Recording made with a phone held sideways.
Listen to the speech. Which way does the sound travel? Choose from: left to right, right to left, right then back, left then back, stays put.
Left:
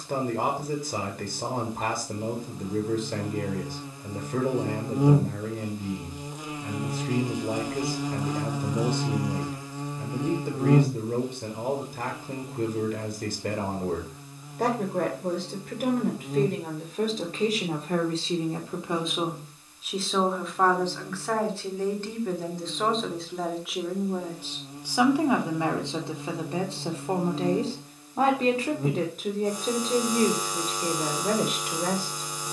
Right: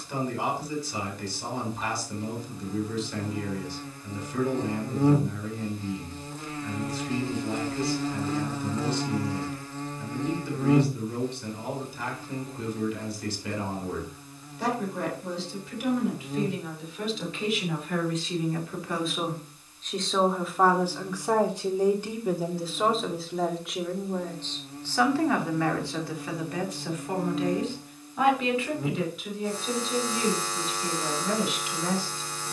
right then back.